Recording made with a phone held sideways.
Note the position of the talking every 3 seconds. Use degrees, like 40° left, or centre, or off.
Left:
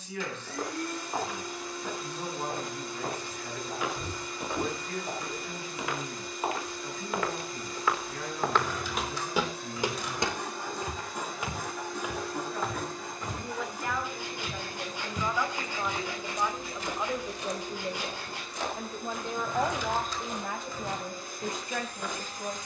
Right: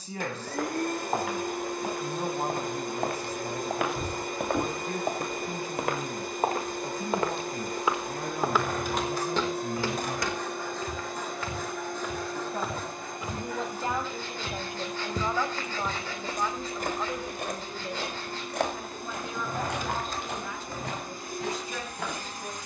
40° right, 40° right, 40° right, 40° right, 30° right, centre, 40° left, 50° left.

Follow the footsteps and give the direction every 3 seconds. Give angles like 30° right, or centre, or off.
70° right, 60° right, 30° right, 20° left, 10° right, 50° right, 70° right, 70° right.